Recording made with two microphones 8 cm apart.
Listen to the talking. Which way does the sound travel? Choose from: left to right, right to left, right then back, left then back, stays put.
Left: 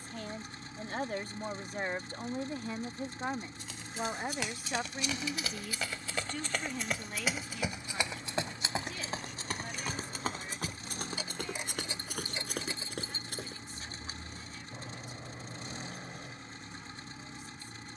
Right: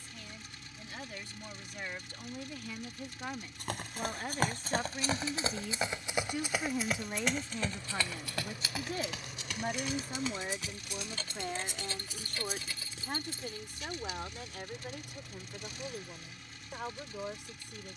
left to right.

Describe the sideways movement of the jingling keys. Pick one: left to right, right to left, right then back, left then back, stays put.
right to left.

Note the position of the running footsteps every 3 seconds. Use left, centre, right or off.
off, right, centre, left, left, off.